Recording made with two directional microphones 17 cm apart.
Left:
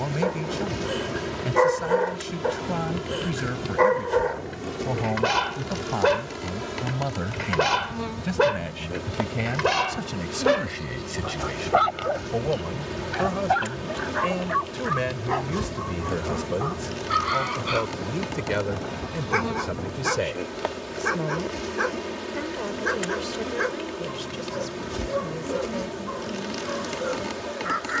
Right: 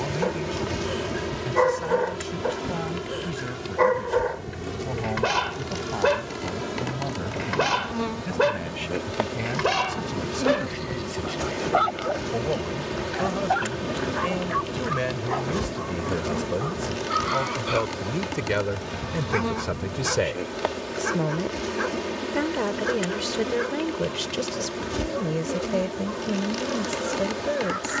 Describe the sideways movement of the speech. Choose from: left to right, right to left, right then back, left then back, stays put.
left to right.